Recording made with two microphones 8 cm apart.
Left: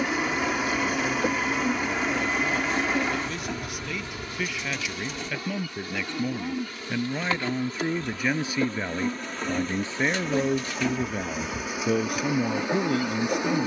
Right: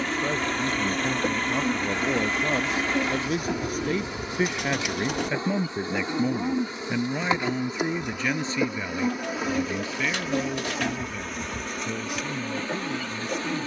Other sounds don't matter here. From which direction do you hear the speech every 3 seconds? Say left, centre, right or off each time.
right, right, centre, left, left.